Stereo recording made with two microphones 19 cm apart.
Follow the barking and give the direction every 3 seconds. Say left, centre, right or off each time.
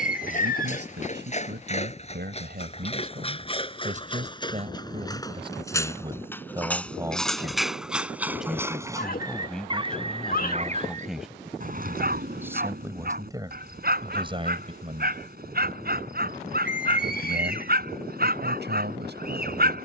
left, left, centre, right, right, right, right.